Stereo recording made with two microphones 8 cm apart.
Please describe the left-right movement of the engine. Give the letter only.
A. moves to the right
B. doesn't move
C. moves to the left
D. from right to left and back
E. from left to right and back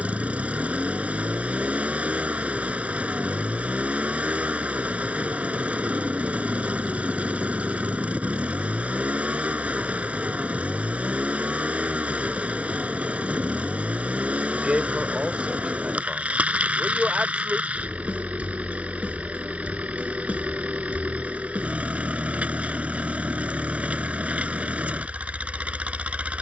B.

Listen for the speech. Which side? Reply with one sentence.
You can hear the speech in the centre.